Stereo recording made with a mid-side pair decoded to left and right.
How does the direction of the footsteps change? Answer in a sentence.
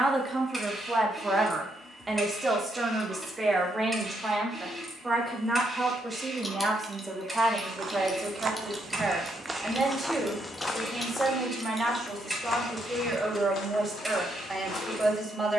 You can hear the footsteps go from the right side to the left.